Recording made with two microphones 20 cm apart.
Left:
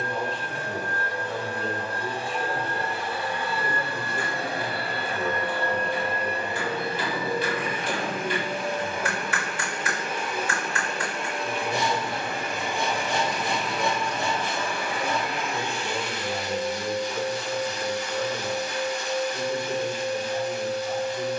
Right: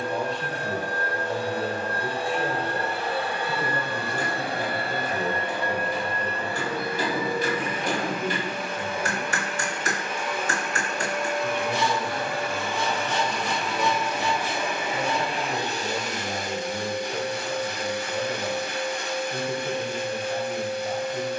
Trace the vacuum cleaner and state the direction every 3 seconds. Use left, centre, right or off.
right, right, left, left, centre, right, right.